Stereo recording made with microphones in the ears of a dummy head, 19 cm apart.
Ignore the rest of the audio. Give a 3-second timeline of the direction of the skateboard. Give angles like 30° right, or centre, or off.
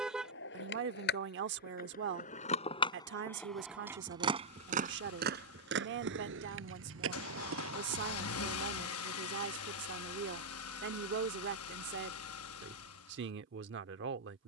50° left, 30° right, 70° right, off, off.